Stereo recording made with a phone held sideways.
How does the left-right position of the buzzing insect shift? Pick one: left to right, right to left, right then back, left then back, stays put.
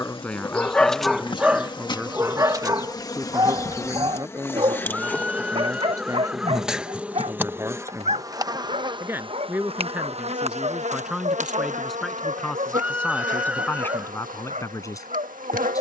left to right.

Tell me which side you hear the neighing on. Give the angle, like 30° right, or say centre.
10° right.